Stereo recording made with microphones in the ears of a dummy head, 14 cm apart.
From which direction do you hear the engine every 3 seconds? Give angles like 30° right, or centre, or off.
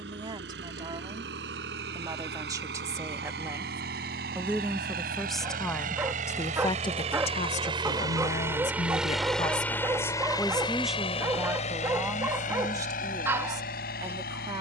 70° right, 60° right, 30° right, 20° left, 60° left.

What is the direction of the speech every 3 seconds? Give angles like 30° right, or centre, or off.
30° right, 10° right, 40° left, 10° left, 20° right.